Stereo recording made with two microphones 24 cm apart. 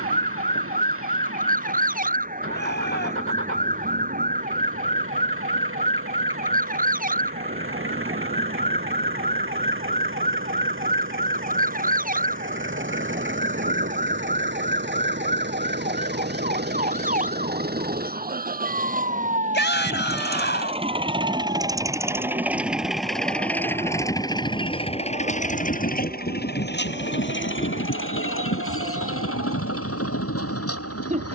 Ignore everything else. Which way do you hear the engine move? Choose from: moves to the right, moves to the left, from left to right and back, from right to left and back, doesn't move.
moves to the left.